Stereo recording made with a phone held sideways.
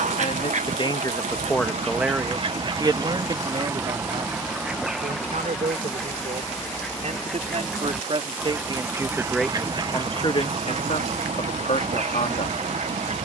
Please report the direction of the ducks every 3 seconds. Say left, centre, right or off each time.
right, centre, centre, right, right.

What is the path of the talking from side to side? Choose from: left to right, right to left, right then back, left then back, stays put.
right then back.